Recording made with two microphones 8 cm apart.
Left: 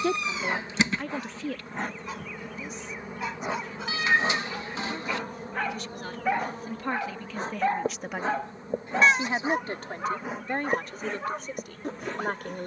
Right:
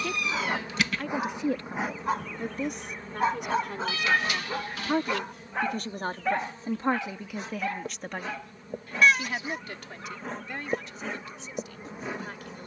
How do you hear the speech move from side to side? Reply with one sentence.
You can hear the speech move from left to right and back again.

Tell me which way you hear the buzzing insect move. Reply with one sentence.
You can hear the buzzing insect go left and come back.